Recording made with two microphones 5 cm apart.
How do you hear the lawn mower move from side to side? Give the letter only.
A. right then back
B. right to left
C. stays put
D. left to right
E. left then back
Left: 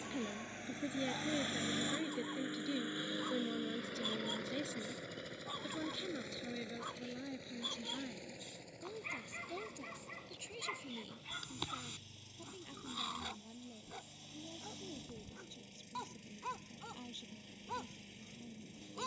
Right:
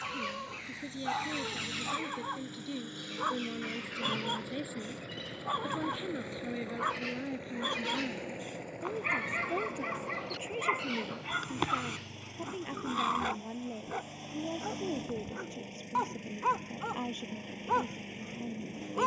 D.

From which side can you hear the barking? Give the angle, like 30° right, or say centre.
40° right.